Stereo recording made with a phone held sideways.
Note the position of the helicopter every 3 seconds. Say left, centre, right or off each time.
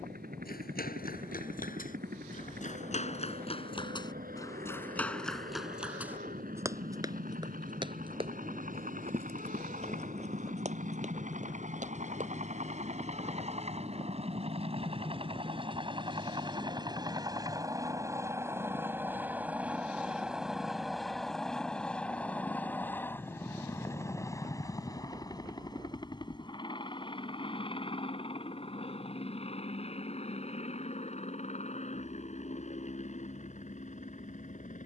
right, right, right, right, right, right, centre, centre, left, left, left, left.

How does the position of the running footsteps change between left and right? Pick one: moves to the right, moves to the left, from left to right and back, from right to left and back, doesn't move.
moves to the right.